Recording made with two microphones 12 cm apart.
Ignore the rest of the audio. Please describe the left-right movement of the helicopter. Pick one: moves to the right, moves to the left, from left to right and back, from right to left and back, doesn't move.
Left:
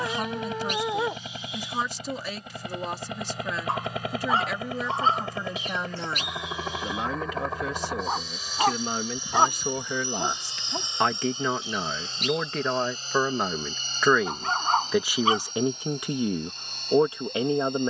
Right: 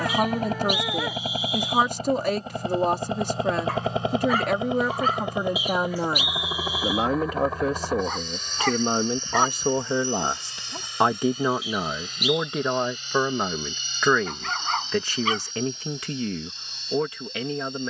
moves to the left.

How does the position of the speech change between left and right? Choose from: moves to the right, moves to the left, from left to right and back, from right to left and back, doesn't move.
moves to the left.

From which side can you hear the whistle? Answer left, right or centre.
centre.